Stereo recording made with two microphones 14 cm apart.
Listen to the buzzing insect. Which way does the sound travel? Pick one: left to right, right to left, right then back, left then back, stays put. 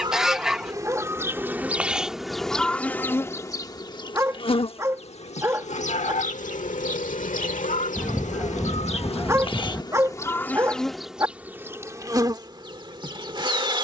left then back.